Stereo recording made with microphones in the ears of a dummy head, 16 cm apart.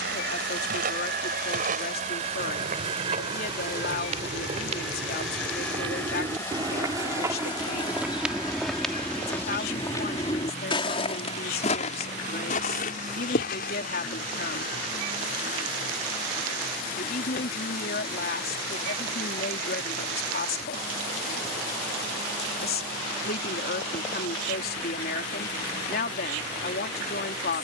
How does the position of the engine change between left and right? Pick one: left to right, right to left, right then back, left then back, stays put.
right to left.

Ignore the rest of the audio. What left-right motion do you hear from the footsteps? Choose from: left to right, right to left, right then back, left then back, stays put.
right to left.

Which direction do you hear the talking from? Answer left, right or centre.
left.